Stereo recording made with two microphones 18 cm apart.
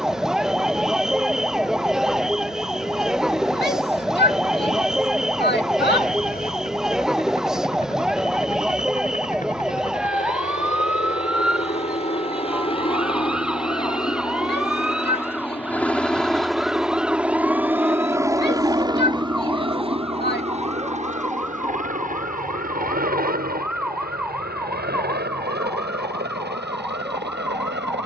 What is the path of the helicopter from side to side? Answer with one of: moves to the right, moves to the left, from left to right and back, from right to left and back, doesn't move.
moves to the right.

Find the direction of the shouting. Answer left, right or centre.
left.